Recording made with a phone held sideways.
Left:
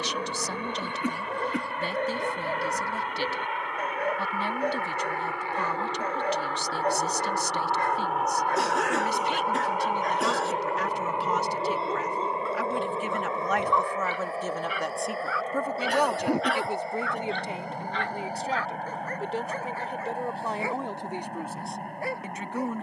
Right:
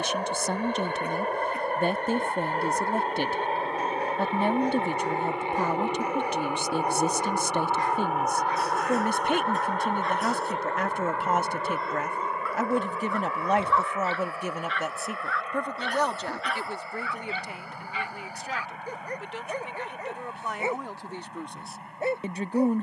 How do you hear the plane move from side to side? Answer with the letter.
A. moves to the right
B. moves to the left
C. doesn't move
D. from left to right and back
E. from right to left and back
B.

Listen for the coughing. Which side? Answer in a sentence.
You can hear the coughing on the left.